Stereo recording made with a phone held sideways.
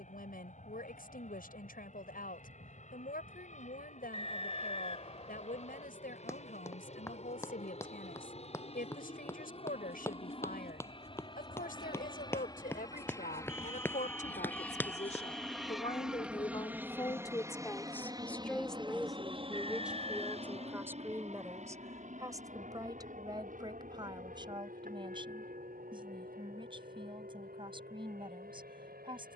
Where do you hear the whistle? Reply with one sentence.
You can hear the whistle on the left.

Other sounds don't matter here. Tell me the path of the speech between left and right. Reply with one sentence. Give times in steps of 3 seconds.
You can hear the speech on the left from 0 s, in the centre from 18 s and on the right from 21 s.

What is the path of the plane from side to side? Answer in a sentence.
You can hear the plane move from left to right.